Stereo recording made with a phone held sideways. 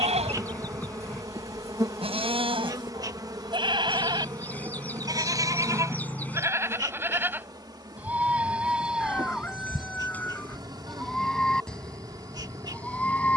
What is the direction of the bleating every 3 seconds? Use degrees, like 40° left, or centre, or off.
40° right, 30° right, 10° right, centre, 10° left.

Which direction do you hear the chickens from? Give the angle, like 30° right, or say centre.
10° left.